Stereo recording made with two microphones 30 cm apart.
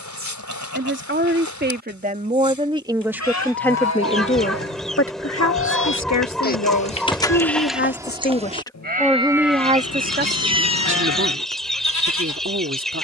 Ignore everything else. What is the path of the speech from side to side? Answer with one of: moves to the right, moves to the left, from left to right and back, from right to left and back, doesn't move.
from right to left and back.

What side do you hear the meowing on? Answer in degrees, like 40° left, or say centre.
60° left.